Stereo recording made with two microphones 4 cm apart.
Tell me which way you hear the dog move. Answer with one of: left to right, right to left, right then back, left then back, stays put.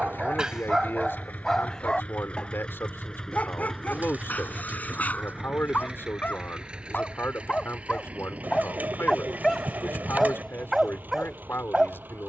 left then back.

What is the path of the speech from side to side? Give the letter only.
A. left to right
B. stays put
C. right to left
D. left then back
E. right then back
B.